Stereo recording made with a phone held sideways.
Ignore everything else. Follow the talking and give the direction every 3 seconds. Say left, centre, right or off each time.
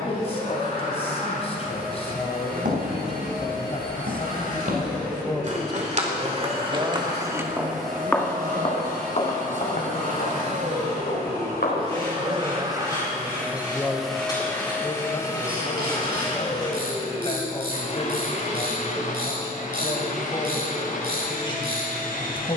left, left, right, right, centre, left, left, left.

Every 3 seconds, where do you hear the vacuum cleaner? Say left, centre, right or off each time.
right, right, right, right, centre, left, left, left.